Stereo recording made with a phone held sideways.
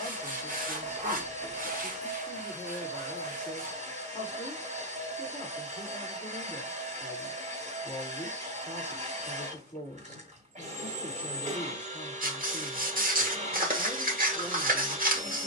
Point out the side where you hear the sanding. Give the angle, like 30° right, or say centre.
60° right.